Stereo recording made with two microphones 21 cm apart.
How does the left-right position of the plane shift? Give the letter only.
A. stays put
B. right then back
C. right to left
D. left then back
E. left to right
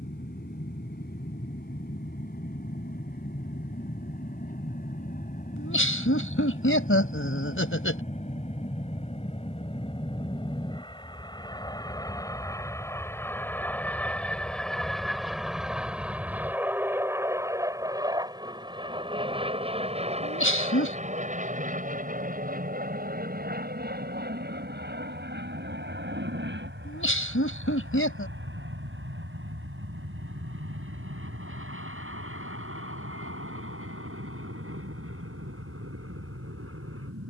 E.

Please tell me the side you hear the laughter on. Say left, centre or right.
left.